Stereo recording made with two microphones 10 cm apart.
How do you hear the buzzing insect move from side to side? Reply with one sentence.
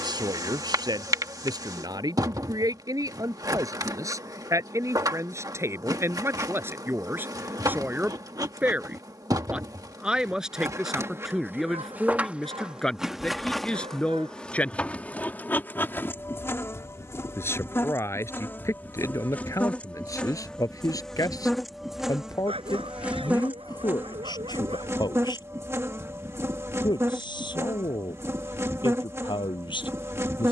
In this clip you hear the buzzing insect go left and come back.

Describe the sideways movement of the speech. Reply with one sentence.
You can hear the speech travel towards the left.